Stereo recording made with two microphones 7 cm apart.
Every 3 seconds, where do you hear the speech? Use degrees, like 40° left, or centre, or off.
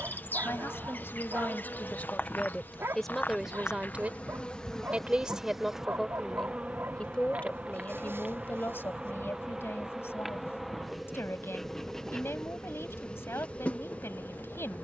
20° left, 10° right, 20° left, 40° left, 40° left.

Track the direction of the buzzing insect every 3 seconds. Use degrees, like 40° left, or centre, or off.
30° left, 10° left, 20° right, centre, 20° left.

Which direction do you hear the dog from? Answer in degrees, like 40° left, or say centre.
40° right.